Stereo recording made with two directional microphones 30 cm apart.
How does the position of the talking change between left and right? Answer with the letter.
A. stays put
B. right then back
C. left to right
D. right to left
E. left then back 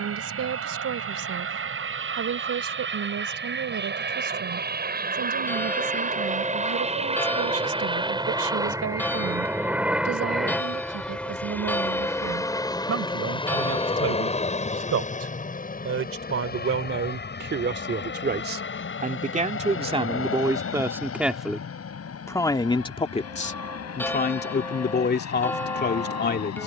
D.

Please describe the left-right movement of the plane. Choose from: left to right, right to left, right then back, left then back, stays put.
right to left.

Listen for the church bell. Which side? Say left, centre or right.
centre.